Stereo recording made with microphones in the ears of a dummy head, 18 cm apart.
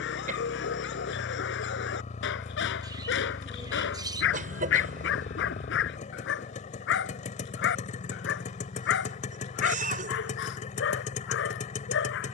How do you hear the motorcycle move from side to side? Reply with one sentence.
In this clip you hear the motorcycle stay put.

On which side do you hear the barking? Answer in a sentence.
You can hear the barking on the left.